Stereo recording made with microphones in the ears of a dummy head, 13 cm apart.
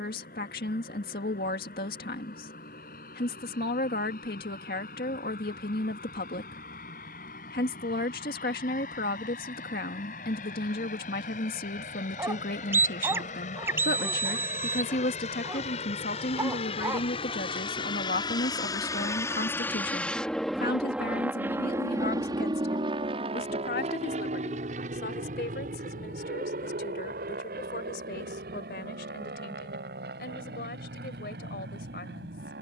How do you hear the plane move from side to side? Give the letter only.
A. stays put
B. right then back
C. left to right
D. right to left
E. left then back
C.